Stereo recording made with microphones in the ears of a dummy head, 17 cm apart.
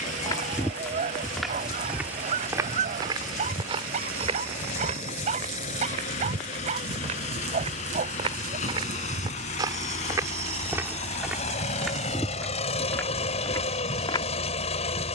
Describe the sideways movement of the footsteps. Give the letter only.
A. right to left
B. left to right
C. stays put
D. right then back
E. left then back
D.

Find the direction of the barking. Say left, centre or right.
right.